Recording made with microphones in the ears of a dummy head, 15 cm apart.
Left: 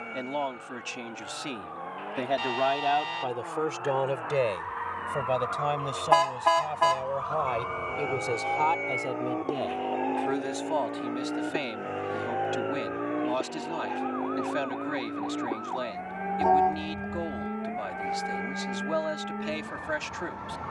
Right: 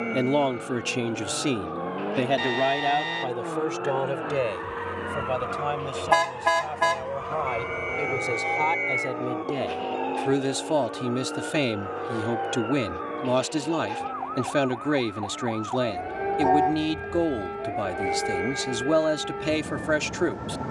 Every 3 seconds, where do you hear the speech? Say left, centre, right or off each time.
right, centre, centre, right, right, right, right.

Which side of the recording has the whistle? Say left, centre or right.
centre.